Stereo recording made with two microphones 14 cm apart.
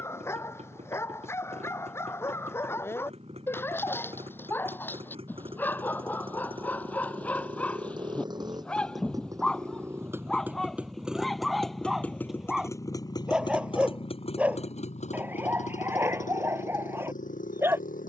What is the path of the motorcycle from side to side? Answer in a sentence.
You can hear the motorcycle move from right to left.